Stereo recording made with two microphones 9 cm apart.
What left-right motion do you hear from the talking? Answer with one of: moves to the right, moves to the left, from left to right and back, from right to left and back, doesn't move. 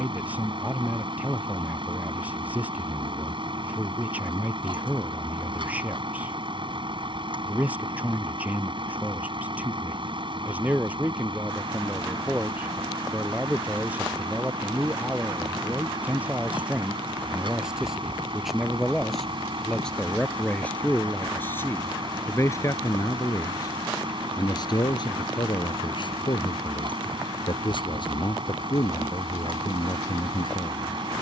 moves to the left.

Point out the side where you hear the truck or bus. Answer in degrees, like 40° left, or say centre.
60° right.